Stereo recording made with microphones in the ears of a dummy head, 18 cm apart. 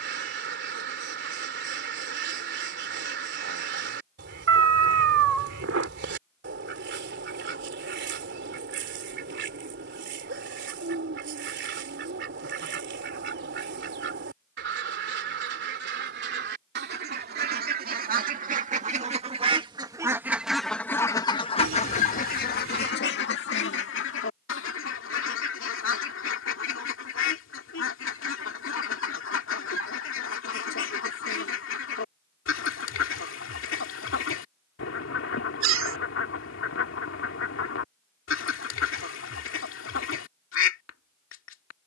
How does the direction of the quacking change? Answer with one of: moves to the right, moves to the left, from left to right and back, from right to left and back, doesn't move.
moves to the left.